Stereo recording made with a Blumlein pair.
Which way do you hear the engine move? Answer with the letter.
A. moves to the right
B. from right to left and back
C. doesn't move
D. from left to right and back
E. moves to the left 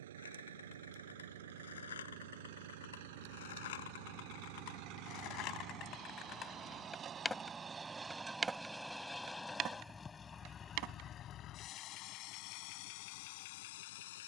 E.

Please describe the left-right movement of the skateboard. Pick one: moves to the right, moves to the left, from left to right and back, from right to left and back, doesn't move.
moves to the right.